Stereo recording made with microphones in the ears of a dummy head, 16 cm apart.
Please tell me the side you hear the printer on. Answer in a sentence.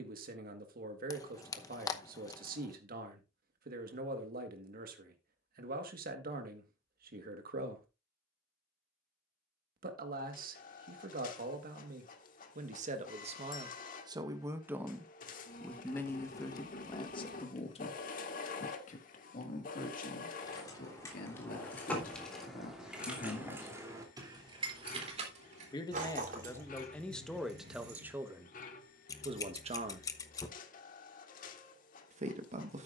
You can hear the printer on the left.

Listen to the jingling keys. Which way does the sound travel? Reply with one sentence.
In this clip you hear the jingling keys move from left to right.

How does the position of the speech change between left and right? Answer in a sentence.
In this clip you hear the speech move from right to left and back again.